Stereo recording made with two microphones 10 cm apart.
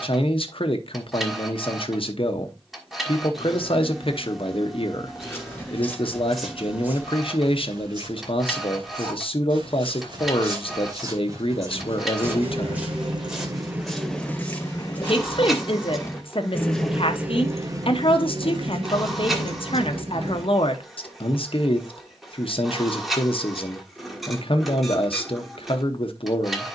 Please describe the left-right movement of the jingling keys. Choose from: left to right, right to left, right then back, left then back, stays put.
left then back.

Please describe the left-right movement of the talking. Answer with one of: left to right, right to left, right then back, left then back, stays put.
stays put.